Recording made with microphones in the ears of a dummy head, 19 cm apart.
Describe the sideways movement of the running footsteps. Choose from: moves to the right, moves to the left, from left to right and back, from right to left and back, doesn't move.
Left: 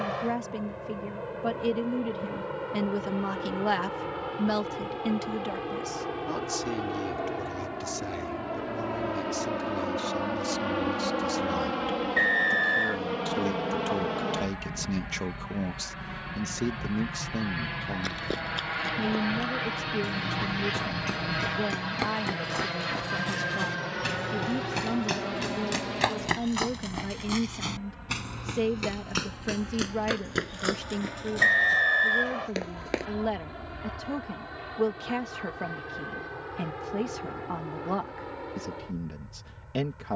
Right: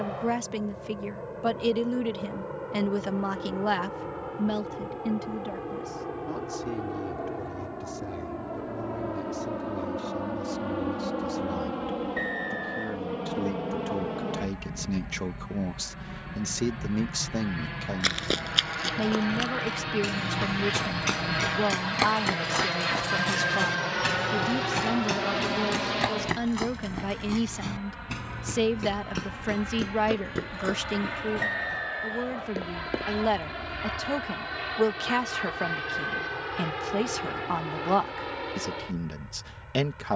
moves to the left.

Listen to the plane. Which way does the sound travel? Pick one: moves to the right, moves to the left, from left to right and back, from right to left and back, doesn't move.
moves to the right.